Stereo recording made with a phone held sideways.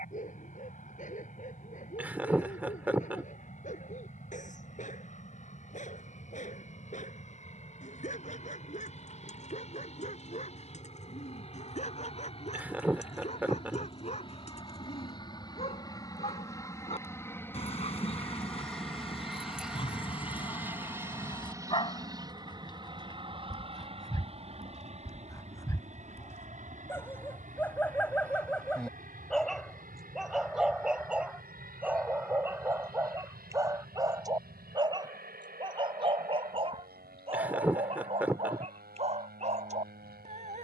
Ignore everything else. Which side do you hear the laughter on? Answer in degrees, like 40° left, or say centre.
10° right.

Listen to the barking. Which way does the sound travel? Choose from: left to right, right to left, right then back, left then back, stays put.
left to right.